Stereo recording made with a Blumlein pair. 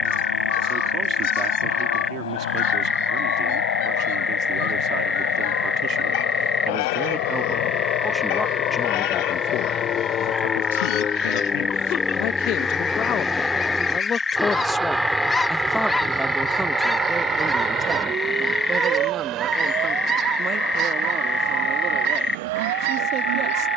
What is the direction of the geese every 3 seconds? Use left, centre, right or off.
left, left, left, left, left, centre, right, right.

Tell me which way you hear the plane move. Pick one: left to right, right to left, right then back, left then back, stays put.
left to right.